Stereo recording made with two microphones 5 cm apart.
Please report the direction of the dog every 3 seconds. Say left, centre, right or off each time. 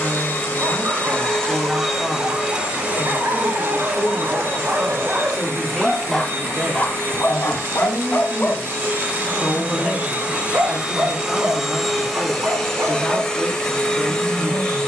right, right, left, right, right.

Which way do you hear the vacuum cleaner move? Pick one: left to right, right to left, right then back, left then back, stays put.
right then back.